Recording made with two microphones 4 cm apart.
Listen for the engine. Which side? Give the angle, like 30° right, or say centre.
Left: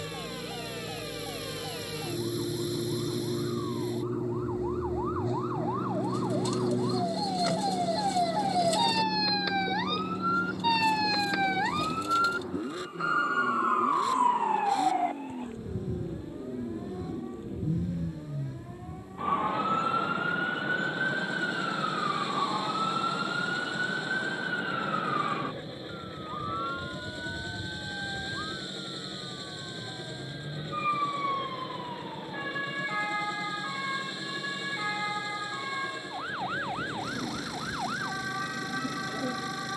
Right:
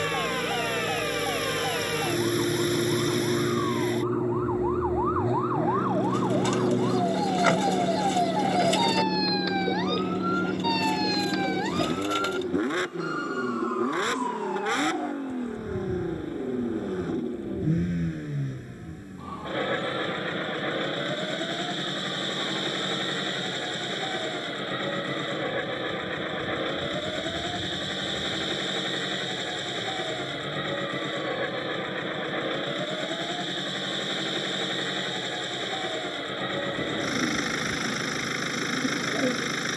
70° right.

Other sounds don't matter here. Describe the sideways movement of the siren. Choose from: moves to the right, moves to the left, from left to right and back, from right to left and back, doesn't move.
moves to the left.